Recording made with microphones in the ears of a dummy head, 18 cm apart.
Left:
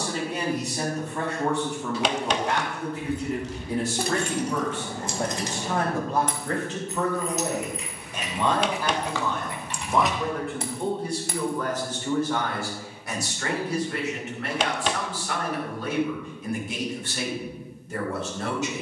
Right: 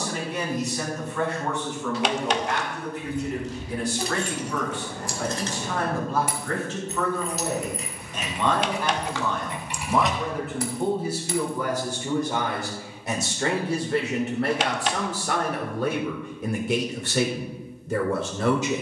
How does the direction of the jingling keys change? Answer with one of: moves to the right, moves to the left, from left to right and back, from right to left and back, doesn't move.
from left to right and back.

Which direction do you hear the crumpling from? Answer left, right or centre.
left.